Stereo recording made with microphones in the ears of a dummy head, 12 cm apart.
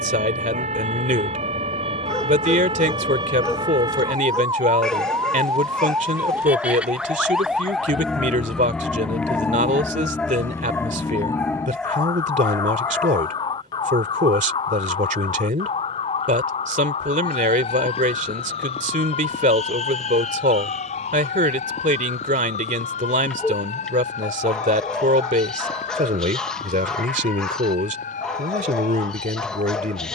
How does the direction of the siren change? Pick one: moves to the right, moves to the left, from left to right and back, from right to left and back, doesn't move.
moves to the left.